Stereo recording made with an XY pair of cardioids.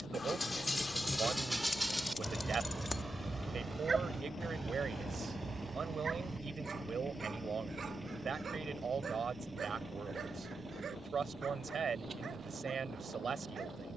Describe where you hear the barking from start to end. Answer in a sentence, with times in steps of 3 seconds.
In this clip you hear the barking in the centre from 0 s and on the right from 3 s.